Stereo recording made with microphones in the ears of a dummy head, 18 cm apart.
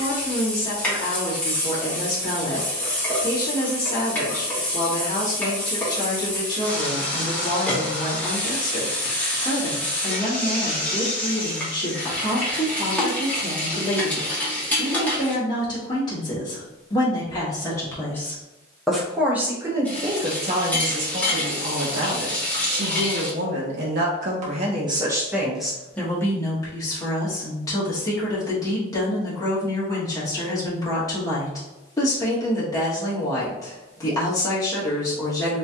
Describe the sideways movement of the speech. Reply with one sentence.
In this clip you hear the speech go right and come back.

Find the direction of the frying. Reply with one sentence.
You can hear the frying in the centre.